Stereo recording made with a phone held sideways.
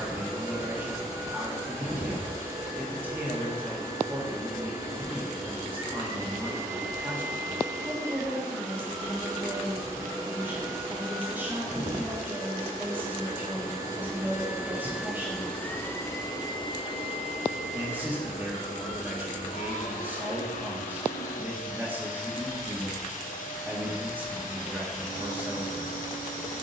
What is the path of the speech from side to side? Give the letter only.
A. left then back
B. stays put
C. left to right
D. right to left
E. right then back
B.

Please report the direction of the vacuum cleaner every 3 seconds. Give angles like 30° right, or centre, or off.
20° right, 20° right, 20° right, 20° right, 20° right, 30° left, 60° left, 60° left, 60° left.